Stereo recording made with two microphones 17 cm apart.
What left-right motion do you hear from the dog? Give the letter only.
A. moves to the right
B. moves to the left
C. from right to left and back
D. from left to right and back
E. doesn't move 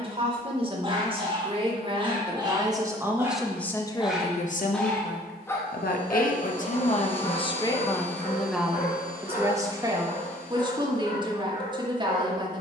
B.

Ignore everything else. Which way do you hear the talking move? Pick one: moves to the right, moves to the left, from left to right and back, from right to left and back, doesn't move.
from right to left and back.